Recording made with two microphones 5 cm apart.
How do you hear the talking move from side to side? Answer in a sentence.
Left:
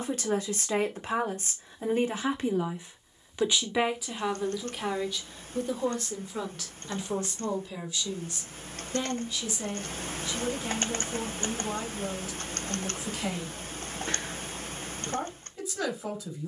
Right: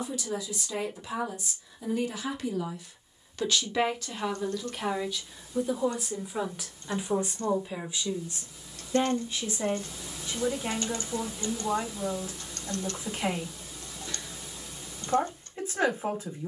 In this clip you hear the talking move to the right.